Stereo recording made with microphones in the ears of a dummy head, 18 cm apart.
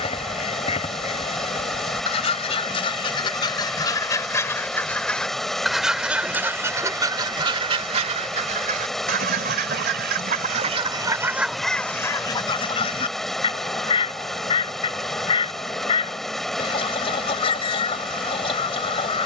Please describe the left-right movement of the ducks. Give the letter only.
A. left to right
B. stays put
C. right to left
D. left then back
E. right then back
E.